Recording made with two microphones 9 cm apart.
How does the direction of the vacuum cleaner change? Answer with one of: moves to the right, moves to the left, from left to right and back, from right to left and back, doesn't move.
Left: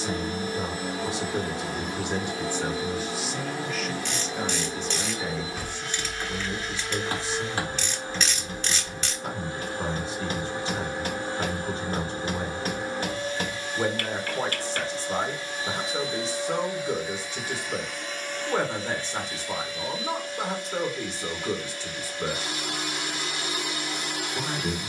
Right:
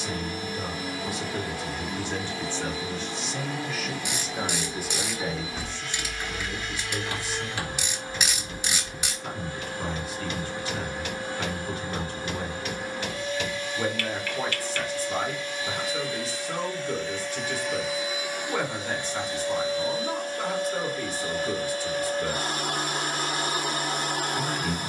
moves to the right.